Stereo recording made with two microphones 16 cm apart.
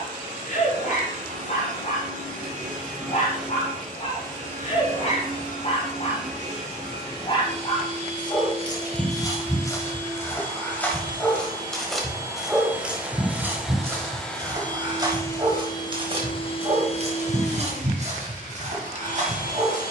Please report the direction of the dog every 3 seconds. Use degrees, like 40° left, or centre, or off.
50° left, 50° left, 30° left, 10° left, 10° right, 40° right, 50° right.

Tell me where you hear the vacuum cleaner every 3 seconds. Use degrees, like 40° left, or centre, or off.
50° right, 50° right, 40° right, 30° right, centre, 30° left, 60° left.